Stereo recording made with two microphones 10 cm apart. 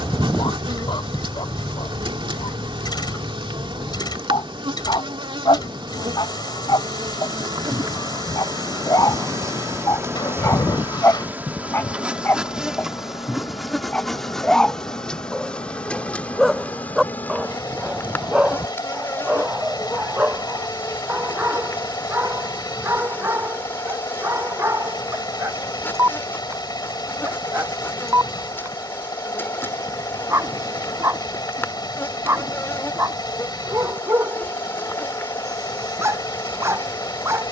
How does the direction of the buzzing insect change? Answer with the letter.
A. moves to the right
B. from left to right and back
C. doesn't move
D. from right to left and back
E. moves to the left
E.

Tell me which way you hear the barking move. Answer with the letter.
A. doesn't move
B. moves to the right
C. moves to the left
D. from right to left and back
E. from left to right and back
B.